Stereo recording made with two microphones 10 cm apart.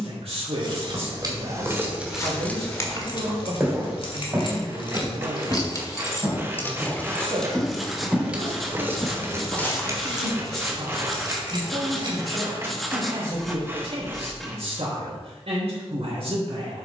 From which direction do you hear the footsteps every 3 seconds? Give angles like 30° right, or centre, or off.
20° left, 20° right, 20° right, 20° left, off, off.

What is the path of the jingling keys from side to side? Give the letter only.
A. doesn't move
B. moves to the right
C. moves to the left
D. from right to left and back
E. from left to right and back
D.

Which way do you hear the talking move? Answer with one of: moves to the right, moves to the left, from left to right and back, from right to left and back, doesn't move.
doesn't move.